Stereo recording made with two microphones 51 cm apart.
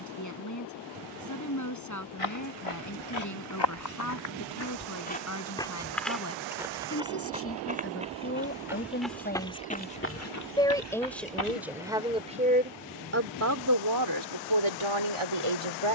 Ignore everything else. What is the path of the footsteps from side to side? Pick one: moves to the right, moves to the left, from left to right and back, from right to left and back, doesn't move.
from left to right and back.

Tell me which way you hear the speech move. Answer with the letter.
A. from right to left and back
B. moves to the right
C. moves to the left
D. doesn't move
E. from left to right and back
B.